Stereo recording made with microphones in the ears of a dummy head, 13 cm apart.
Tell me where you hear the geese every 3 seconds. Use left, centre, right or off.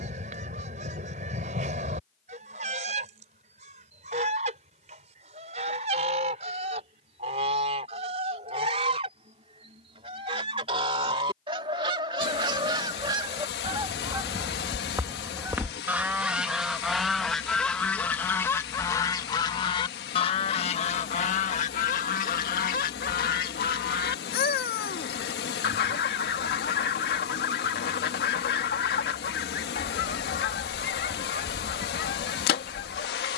right, right, right, right, right, centre, left, left, left, left, left.